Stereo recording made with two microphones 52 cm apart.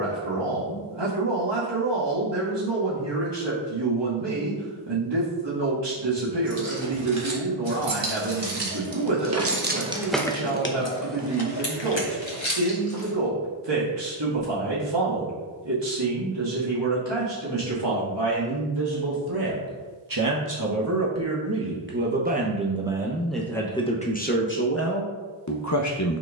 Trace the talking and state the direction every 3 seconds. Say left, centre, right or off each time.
right, right, right, right, right, right, right, centre, left.